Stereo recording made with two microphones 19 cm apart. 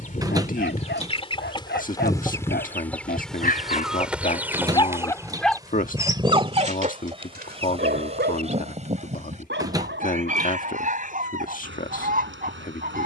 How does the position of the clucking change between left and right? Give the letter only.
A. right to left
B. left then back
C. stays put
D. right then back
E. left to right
E.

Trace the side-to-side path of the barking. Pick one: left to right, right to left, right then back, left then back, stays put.
left to right.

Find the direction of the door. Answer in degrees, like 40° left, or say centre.
20° right.